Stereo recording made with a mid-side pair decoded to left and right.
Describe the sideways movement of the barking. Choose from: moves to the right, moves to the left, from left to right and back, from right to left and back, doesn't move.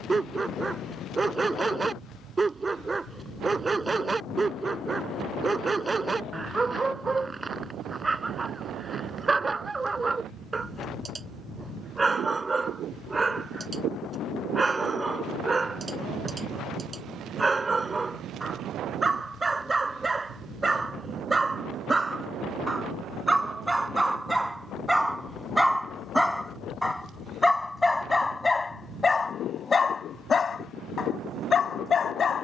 moves to the left.